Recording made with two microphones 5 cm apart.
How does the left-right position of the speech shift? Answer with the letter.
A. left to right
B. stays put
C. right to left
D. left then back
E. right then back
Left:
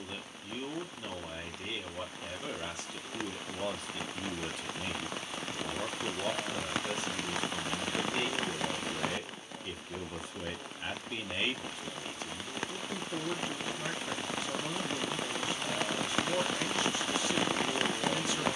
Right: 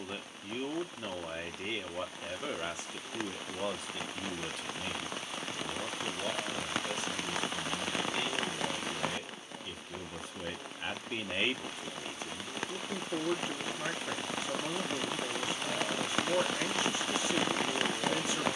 D.